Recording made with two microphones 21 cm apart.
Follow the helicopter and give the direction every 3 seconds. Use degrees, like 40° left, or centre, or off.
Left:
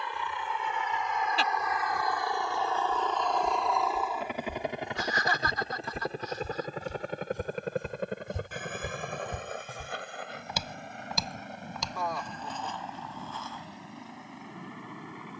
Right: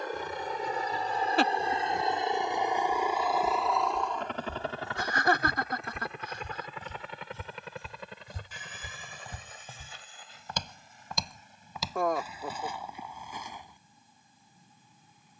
30° right, 10° left, 50° left, 60° left, 70° left.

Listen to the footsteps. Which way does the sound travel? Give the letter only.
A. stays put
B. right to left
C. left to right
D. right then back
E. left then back
E.